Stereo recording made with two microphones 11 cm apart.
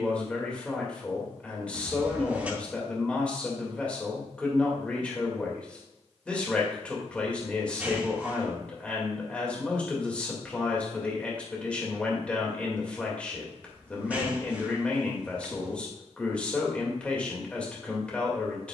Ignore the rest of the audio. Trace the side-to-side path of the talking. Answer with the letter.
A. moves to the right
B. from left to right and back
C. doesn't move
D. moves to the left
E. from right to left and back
C.